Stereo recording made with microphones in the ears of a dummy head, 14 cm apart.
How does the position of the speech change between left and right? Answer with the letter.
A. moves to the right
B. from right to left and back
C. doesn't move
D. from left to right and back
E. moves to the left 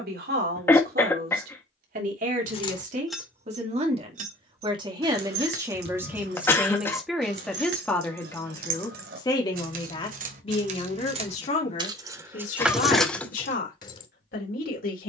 E.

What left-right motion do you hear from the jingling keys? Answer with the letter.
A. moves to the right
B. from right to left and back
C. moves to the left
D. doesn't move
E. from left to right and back
E.